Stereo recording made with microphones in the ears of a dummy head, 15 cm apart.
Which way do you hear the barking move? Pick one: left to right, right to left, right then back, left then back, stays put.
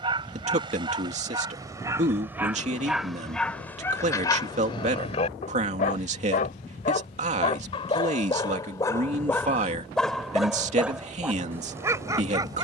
left then back.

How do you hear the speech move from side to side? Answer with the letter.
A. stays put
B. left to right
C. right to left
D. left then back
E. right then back
A.